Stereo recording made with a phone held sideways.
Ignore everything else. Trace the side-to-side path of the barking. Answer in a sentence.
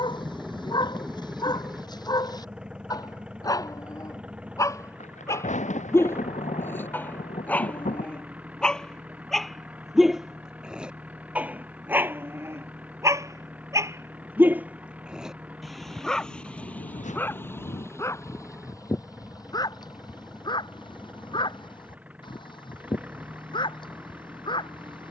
In this clip you hear the barking move from left to right and back again.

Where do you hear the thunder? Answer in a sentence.
In this clip you hear the thunder on the left.